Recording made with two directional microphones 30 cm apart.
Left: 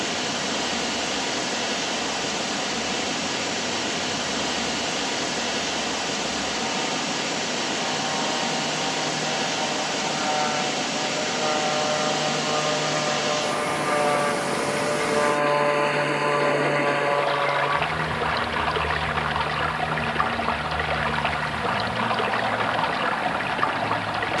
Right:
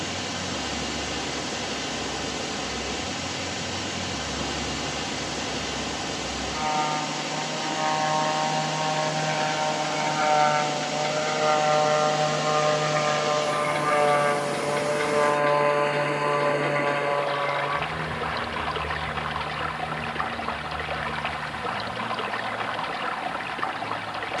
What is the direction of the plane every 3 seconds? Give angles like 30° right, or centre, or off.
60° right, 60° right, 50° right, 40° right, 20° right, 10° left, 40° left, 60° left.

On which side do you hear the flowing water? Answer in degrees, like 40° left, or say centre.
30° left.